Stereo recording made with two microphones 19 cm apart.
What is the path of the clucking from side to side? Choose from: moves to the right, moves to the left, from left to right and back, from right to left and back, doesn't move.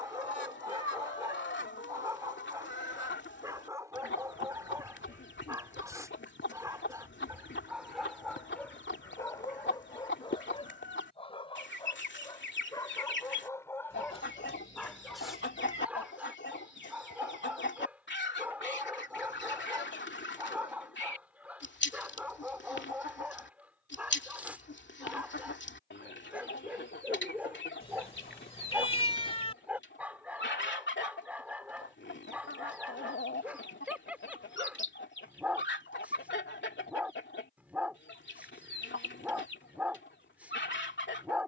doesn't move.